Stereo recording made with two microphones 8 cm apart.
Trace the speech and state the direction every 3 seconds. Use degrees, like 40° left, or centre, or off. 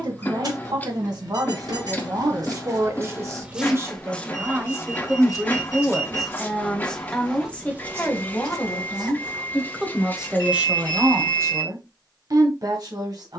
50° right, 20° right, 10° left, 10° right, 60° right.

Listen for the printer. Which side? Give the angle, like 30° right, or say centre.
20° left.